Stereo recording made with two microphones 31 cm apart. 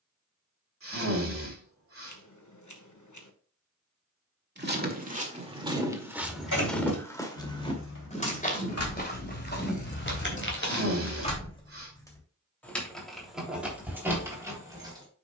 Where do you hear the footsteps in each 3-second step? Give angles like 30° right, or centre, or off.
off, 20° right, 10° left, 40° left, off.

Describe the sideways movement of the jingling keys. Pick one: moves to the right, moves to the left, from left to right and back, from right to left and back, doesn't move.
moves to the right.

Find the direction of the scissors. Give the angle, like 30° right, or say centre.
70° left.